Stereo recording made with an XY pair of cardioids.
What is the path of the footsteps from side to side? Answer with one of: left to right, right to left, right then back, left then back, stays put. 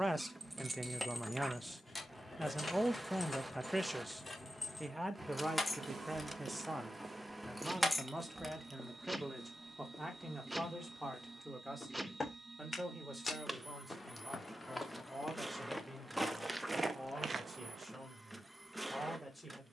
left then back.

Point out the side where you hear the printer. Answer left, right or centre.
centre.